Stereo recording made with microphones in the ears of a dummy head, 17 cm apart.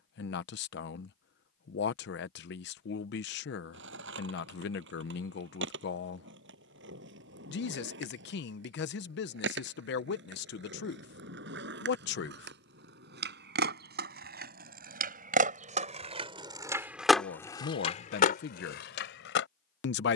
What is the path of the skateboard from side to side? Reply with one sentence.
In this clip you hear the skateboard go from the right side to the left.